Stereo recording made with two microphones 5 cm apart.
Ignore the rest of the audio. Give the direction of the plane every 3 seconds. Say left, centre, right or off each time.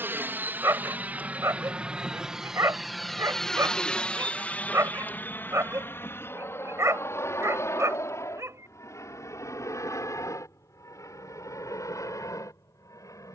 right, left, left, left, left.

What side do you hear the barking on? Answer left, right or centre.
right.